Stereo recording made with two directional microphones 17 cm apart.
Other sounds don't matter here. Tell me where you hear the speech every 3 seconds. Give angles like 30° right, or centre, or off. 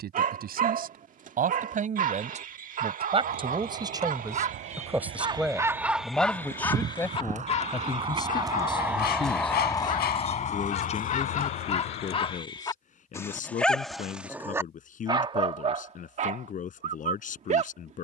50° right, 20° right, 20° left, 40° left, 40° left, 50° left.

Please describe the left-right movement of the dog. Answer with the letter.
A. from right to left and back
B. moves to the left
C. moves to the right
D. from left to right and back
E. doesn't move
A.